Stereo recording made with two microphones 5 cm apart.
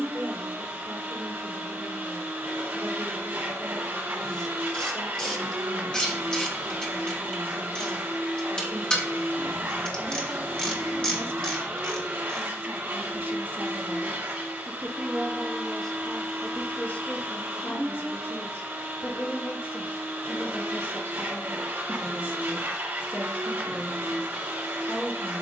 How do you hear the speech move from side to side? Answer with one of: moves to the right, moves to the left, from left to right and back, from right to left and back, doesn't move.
moves to the left.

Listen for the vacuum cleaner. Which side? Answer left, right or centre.
right.